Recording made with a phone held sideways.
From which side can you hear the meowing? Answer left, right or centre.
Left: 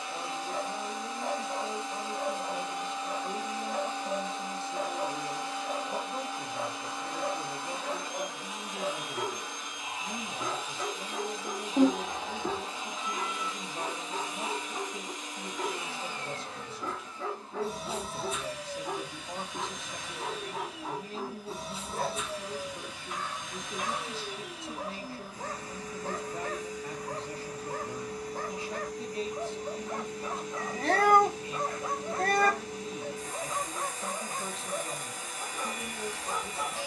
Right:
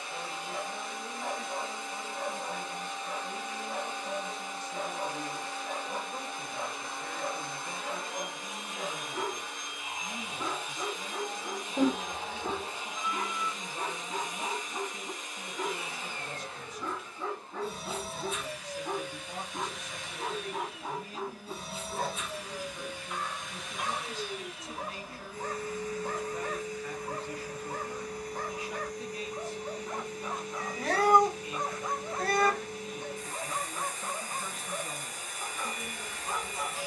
left.